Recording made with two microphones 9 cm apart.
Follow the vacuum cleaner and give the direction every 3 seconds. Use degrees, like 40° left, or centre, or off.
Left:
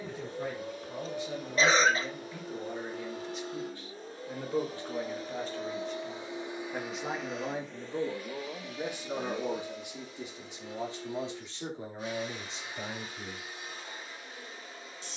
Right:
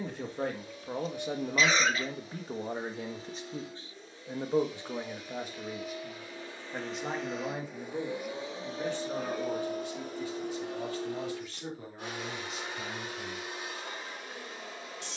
50° left, 40° left, centre, 60° right, 80° right.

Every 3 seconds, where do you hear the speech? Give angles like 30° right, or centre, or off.
50° right, 20° right, centre, 20° left, 30° left.